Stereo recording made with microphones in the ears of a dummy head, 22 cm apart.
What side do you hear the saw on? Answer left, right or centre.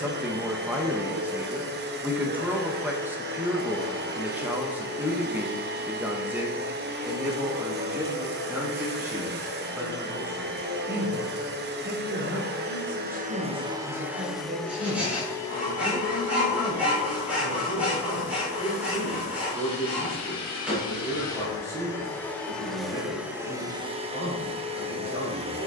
centre.